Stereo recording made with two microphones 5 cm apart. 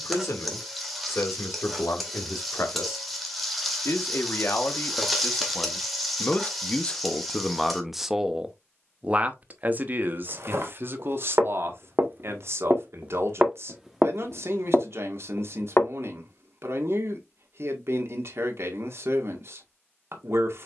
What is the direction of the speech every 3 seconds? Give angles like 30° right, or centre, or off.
70° left, 50° left, 10° left, 40° right, 60° right, 60° right, 60° right.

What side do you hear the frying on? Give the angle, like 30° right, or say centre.
centre.